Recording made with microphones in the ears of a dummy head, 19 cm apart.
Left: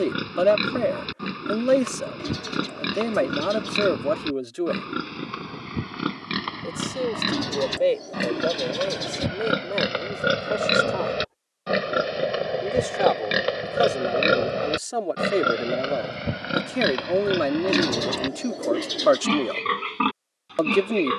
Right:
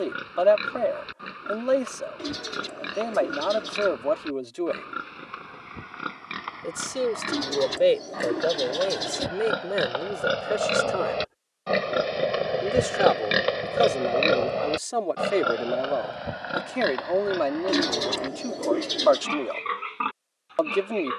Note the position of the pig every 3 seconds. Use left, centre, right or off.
left, left, left, left, centre, left, left.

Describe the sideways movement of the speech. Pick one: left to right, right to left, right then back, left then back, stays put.
right then back.